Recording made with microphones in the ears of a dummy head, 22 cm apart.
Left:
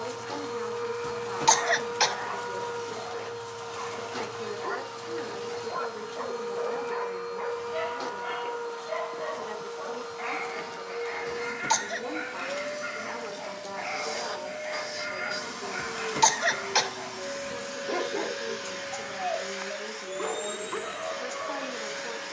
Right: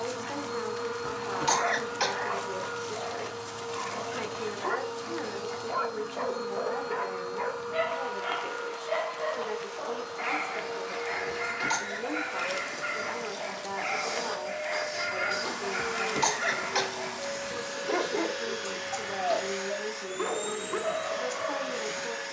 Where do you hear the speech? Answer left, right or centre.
centre.